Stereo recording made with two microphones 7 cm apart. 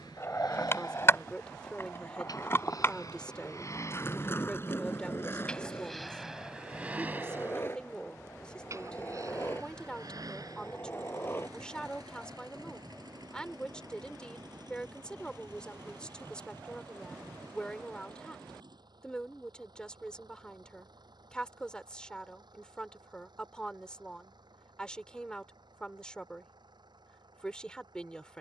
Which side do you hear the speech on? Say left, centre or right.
centre.